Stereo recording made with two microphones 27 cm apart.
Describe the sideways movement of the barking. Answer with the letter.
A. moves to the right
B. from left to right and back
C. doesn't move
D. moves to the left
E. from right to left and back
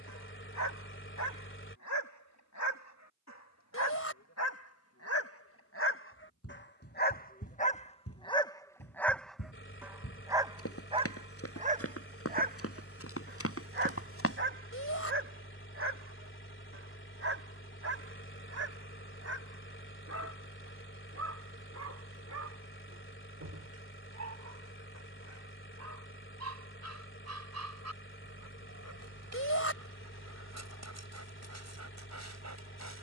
A.